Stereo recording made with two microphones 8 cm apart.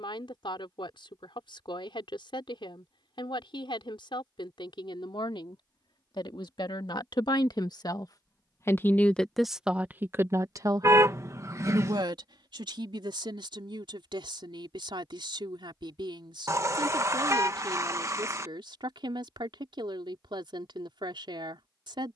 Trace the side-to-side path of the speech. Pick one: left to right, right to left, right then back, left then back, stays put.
left to right.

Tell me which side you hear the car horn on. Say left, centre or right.
right.